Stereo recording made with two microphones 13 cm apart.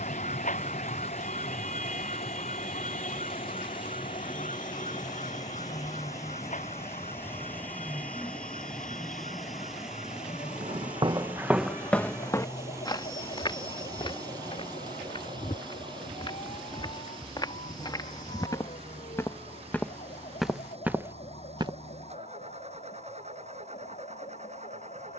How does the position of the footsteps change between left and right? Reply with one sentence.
You can hear the footsteps go left and come back.